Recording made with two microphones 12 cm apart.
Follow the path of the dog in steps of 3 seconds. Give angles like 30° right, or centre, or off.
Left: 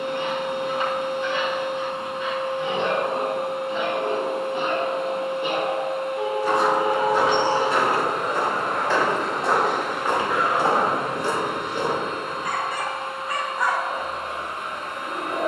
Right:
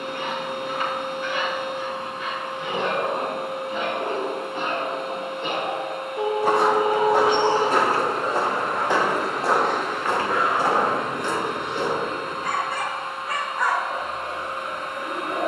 30° left, 20° left, 10° right, centre, 20° left.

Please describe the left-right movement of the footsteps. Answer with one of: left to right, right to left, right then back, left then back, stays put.
right to left.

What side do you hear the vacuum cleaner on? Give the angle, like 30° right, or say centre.
80° left.